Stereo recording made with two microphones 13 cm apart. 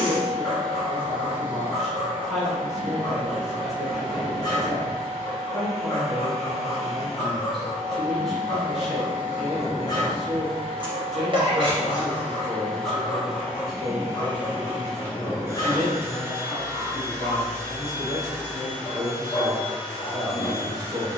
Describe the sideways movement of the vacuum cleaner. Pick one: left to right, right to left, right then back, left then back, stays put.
left to right.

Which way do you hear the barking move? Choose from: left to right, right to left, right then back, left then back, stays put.
stays put.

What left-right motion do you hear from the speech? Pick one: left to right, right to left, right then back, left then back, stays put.
stays put.